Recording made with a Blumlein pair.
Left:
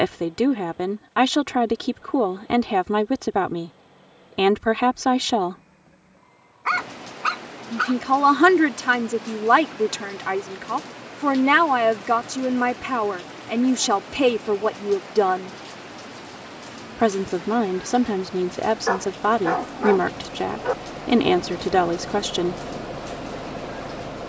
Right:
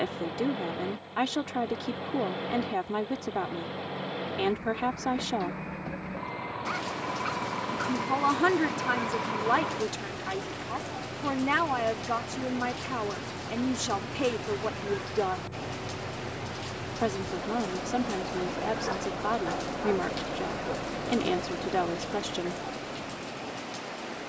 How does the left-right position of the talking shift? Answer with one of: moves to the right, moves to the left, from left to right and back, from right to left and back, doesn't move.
doesn't move.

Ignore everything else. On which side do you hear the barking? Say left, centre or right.
left.